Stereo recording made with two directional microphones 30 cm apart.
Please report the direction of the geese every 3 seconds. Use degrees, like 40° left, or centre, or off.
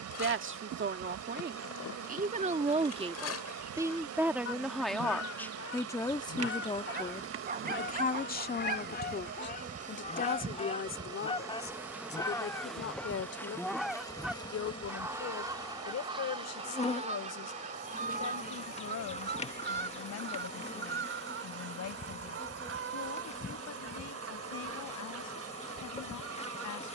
60° left, 50° left, 40° left, 20° left, centre, 20° right, 40° right, 50° right, 50° right.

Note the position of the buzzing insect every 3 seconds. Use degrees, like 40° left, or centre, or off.
60° right, 60° right, 40° right, 20° right, 10° left, 20° left, 20° left, 20° left, 20° left.